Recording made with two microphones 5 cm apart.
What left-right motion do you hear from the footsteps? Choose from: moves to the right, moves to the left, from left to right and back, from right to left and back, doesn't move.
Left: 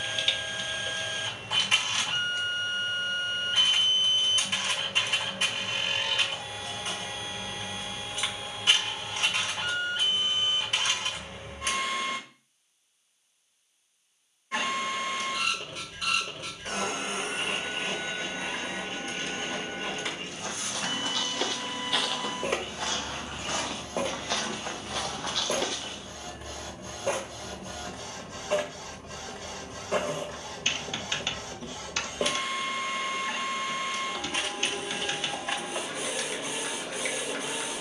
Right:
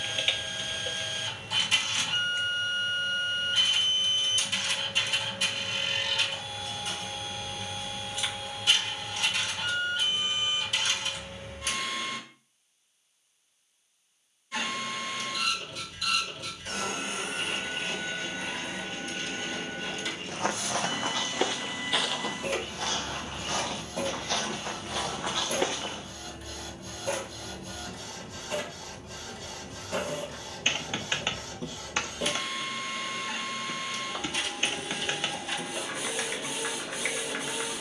from right to left and back.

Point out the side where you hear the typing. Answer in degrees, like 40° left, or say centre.
20° right.